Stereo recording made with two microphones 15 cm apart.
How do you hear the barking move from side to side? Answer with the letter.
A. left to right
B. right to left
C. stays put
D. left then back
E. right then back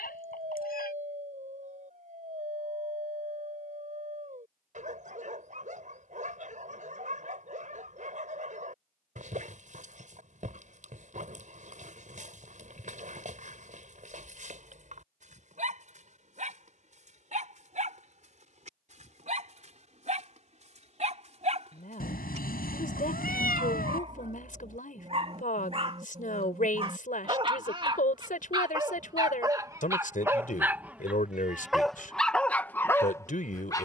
B.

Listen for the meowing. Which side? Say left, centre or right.
left.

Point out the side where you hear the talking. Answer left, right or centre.
left.